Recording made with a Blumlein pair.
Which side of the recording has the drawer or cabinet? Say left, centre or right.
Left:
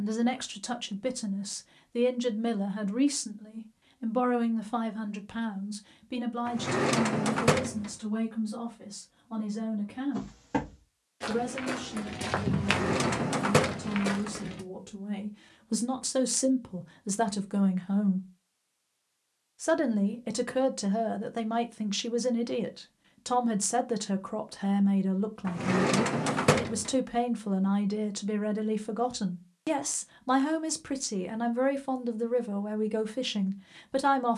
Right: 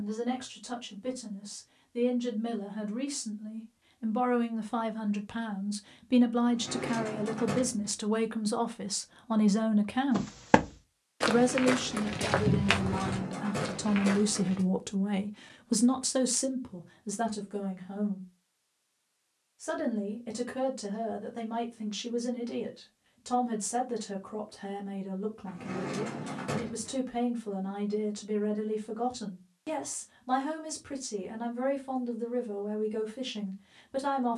left.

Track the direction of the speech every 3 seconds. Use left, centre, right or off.
left, centre, right, right, right, centre, left, left, left, left, left, left.